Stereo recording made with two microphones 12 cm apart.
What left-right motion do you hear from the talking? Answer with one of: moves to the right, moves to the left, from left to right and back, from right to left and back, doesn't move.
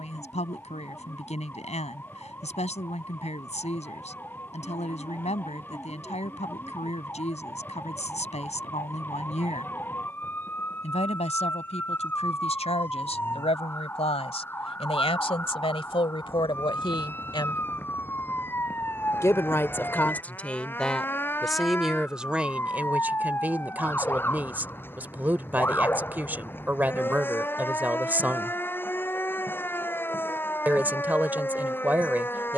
moves to the right.